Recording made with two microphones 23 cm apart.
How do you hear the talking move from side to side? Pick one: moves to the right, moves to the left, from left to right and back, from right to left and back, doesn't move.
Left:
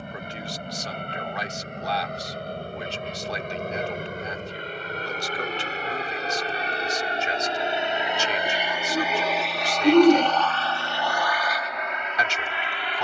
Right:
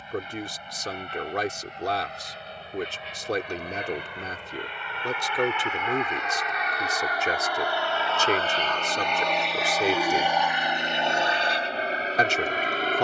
doesn't move.